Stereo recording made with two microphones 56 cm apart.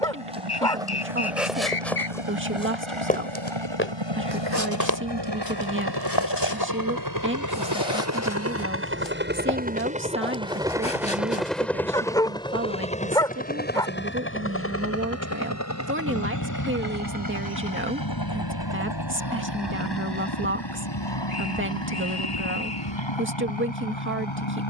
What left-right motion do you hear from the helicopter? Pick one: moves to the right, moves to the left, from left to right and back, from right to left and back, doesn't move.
moves to the left.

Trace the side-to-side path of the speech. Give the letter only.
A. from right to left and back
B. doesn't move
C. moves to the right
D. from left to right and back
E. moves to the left
B.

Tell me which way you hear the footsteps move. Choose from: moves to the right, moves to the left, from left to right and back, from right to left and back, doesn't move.
moves to the left.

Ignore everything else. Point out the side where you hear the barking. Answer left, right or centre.
centre.